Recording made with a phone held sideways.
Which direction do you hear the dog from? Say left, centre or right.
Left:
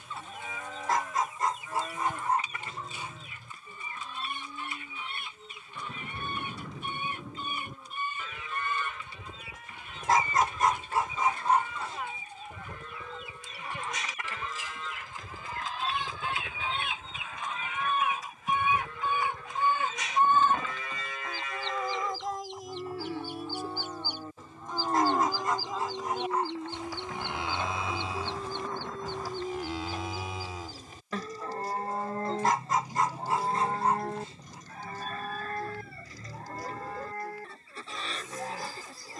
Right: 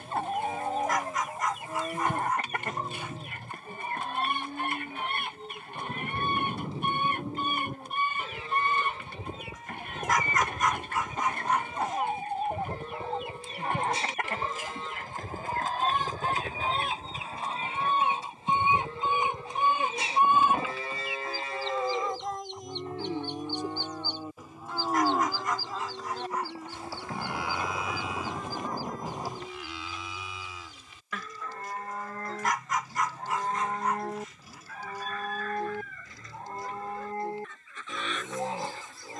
left.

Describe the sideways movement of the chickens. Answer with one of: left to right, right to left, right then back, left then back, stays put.
right to left.